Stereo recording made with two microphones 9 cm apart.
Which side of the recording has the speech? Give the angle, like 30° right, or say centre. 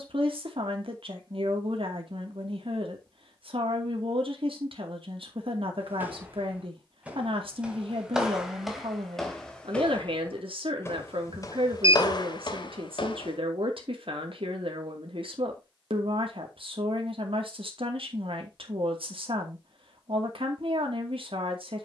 70° right.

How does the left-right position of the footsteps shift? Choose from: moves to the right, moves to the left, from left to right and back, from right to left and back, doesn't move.
moves to the left.